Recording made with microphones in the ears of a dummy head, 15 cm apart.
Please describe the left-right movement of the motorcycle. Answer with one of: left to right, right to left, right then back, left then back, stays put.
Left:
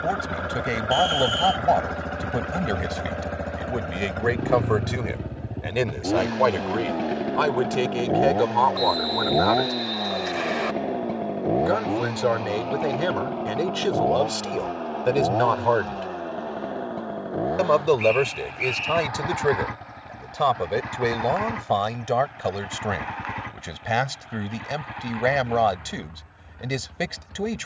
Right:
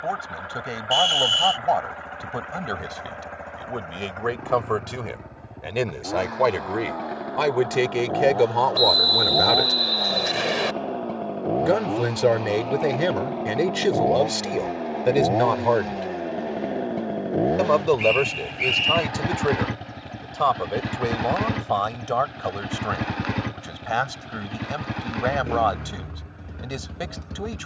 left to right.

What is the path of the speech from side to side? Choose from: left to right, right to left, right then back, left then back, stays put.
right then back.